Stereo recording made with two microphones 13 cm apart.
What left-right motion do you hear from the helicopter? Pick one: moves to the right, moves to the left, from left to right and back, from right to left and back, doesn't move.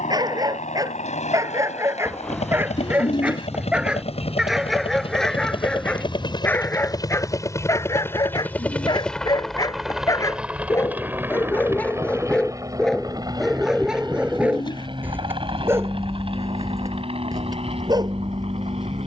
moves to the right.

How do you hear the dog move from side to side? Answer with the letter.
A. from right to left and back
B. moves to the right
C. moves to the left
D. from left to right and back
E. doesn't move
A.